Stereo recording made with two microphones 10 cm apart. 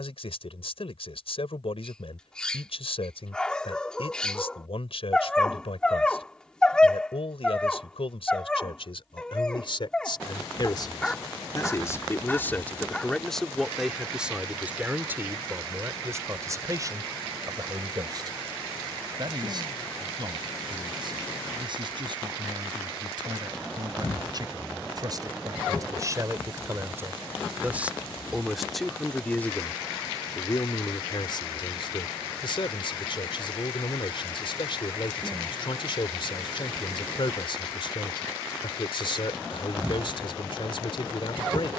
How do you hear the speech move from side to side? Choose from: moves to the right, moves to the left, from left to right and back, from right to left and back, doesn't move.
from left to right and back.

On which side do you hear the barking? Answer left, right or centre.
centre.